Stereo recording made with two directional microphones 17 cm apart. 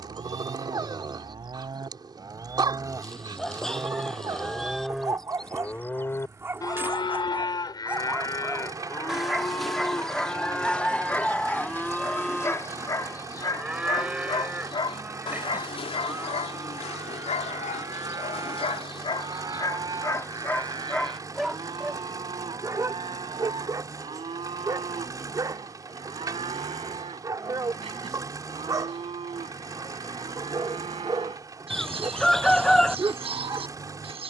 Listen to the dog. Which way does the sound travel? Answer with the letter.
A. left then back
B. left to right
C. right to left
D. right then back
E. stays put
A.